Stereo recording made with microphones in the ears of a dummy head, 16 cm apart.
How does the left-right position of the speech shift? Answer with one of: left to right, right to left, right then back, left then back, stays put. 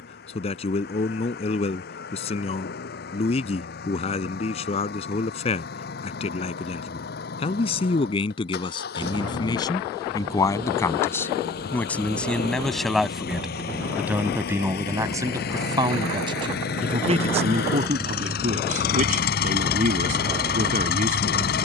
left to right.